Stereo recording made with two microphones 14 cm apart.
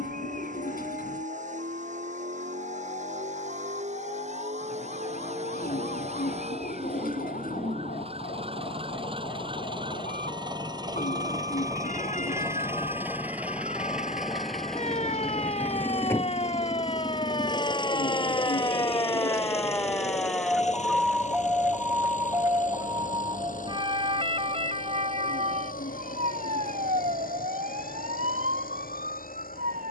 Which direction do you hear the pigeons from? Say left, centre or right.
left.